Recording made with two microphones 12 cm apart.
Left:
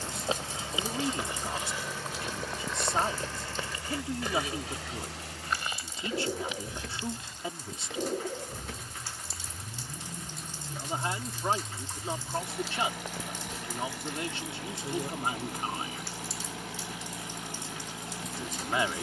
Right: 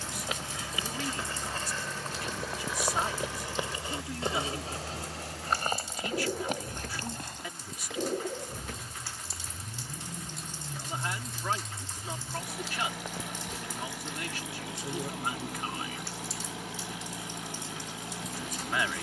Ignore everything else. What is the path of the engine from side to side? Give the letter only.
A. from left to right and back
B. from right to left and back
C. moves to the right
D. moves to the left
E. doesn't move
E.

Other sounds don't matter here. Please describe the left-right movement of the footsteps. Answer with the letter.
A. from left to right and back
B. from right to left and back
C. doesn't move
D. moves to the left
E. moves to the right
E.